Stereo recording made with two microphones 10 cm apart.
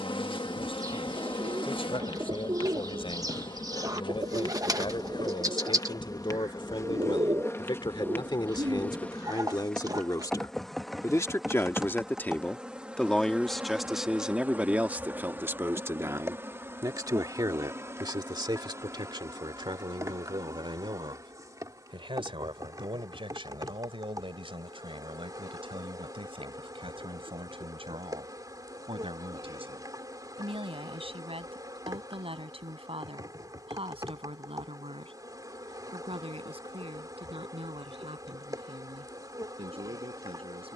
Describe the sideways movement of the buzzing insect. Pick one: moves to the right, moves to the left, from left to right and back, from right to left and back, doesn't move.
moves to the right.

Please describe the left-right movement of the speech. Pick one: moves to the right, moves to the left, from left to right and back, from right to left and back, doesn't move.
moves to the right.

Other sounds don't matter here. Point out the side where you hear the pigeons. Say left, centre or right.
right.